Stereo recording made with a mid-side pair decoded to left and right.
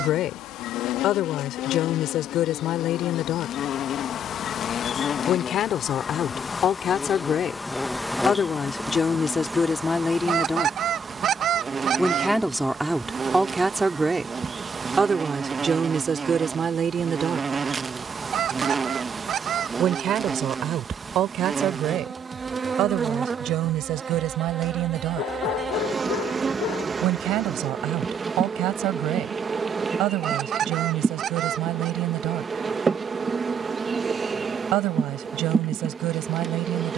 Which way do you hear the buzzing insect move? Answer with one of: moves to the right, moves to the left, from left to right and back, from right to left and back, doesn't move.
moves to the right.